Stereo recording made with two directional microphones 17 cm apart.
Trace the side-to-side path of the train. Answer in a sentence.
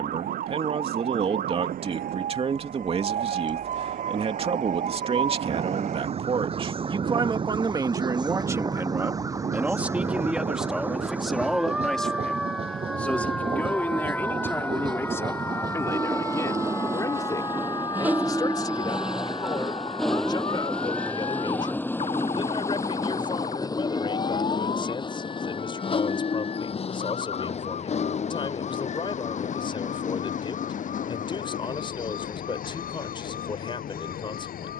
In this clip you hear the train move from right to left.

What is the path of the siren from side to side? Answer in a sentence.
In this clip you hear the siren move from right to left.